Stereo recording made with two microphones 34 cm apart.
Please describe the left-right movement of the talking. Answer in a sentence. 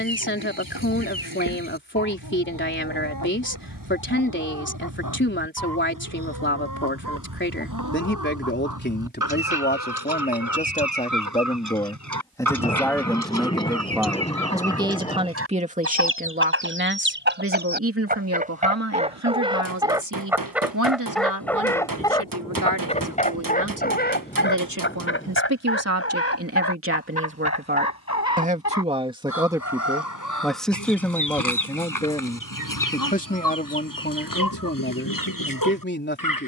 In this clip you hear the talking move from left to right and back again.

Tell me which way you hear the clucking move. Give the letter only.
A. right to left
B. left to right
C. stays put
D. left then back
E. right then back
A.